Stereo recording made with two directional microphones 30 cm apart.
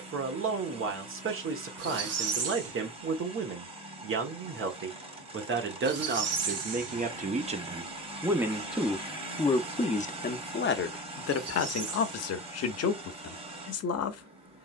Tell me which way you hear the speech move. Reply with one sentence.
In this clip you hear the speech move from right to left.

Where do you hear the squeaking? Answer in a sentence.
In this clip you hear the squeaking on the right.